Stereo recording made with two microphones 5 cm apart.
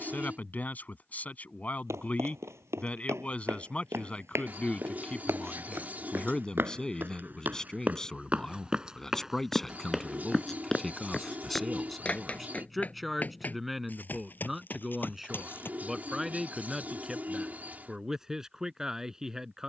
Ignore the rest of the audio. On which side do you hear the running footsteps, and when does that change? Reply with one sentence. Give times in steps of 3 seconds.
In this clip you hear the running footsteps on the right from 0 s, in the centre from 9 s, on the left from 12 s and not at all from 18 s.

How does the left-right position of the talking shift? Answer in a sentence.
You can hear the talking go from the left side to the right.